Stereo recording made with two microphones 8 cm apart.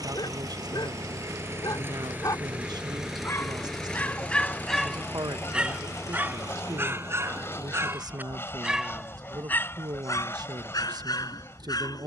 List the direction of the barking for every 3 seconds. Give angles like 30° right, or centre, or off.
60° left, 10° left, 30° right, 50° left.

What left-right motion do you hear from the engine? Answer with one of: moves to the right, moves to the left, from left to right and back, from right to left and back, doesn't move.
moves to the left.